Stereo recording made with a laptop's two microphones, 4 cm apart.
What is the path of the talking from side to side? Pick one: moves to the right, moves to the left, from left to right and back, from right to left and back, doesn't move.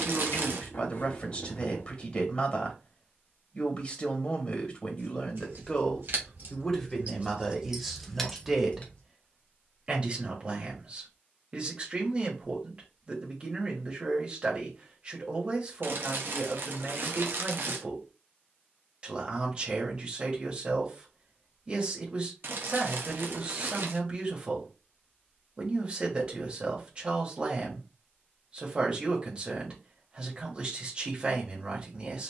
moves to the right.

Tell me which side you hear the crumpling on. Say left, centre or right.
right.